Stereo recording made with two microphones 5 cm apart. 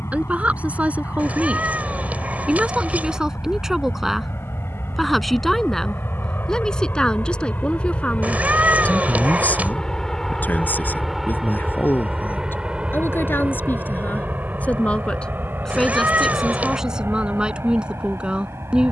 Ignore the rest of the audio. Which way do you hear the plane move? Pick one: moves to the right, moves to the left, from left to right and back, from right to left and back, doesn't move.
moves to the right.